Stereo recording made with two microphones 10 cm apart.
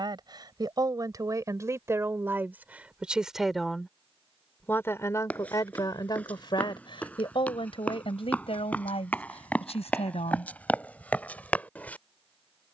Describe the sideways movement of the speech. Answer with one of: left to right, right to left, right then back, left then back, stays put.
right to left.